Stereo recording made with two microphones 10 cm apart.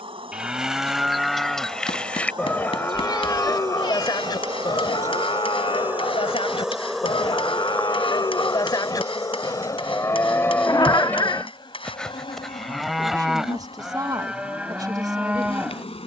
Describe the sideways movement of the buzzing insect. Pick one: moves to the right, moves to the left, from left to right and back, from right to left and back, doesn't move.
moves to the left.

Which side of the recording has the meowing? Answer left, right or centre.
left.